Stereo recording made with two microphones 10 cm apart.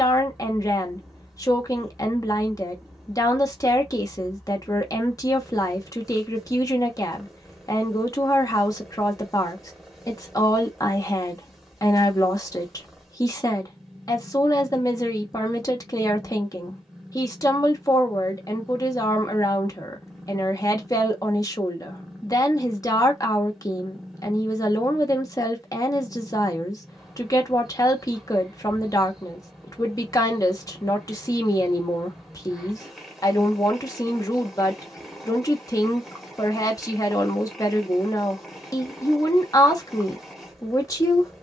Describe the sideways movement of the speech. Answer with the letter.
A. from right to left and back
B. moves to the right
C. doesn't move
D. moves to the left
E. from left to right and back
C.